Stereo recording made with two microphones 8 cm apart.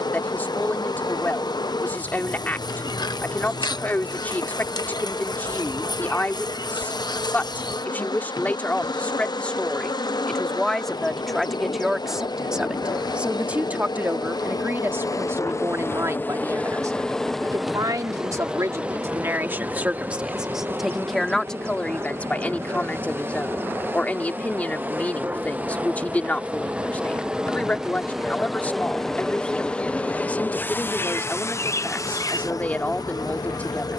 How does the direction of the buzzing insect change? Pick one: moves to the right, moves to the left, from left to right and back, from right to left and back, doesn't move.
from left to right and back.